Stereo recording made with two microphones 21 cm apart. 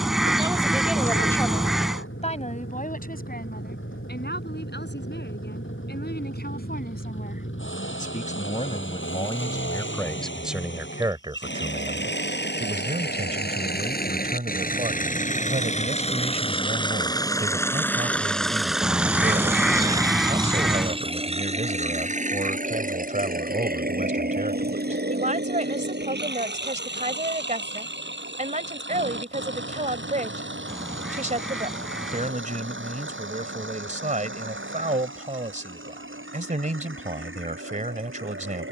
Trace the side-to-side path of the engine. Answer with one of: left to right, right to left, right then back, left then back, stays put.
left to right.